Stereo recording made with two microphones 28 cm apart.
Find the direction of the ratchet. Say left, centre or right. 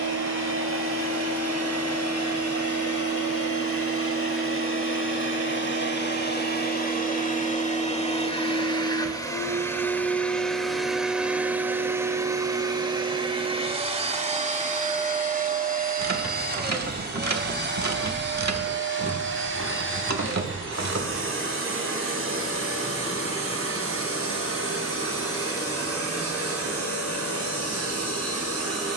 right.